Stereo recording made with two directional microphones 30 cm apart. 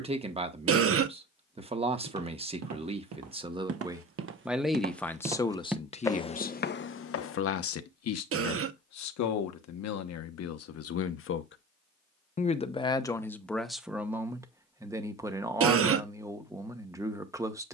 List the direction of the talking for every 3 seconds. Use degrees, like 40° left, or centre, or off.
20° right, centre, 50° left, 60° left, centre, 10° right.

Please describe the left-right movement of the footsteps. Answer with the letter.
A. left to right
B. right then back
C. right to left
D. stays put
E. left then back
C.